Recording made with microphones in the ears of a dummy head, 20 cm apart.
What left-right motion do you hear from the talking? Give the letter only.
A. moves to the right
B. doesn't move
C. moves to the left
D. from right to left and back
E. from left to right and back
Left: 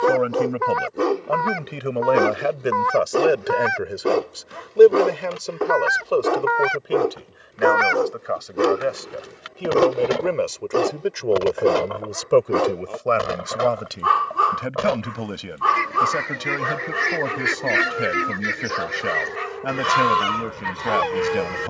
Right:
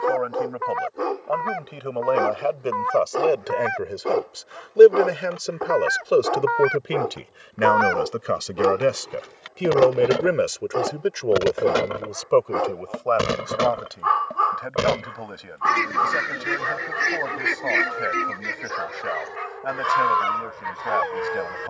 E.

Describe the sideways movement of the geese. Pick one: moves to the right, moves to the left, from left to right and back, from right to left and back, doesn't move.
from left to right and back.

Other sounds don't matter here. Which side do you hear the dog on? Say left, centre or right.
left.